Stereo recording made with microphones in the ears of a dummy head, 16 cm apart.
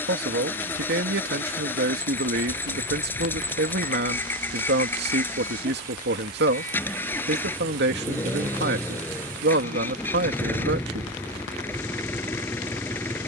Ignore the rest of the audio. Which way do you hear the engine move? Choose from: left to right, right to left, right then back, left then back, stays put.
stays put.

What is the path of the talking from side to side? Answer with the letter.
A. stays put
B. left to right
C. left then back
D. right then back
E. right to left
A.